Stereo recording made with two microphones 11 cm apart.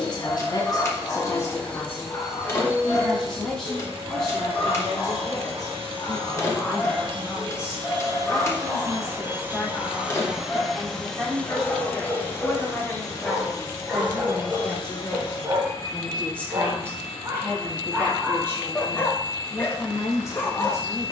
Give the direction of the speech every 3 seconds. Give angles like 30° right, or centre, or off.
30° left, centre, 10° right, centre, centre, 10° left, 20° left.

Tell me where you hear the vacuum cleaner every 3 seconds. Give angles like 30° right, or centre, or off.
10° left, 50° right, 40° right, centre, 30° left, 40° left, 40° left.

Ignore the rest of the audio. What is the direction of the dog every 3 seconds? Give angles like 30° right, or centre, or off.
30° left, 30° left, 30° left, 20° left, 10° right, 30° right, 10° left.